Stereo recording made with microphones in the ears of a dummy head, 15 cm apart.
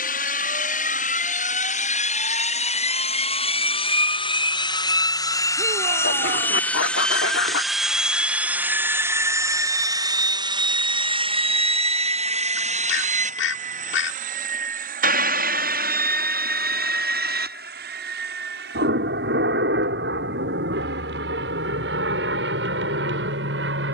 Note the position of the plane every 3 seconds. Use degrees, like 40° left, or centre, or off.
50° left, 30° left, centre, 30° right, 40° right, 50° right, 60° right, 70° right.